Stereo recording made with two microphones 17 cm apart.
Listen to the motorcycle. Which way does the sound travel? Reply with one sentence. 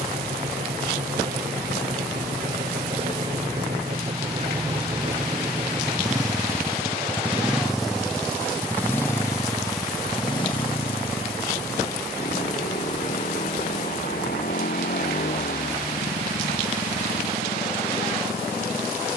In this clip you hear the motorcycle go from the right side to the left.